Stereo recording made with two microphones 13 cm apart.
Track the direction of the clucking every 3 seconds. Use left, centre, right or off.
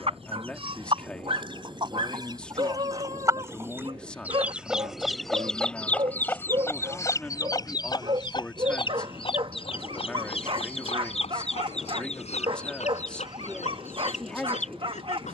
right, centre, left, left, left.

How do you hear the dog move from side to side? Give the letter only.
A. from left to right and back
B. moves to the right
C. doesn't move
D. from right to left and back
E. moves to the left
C.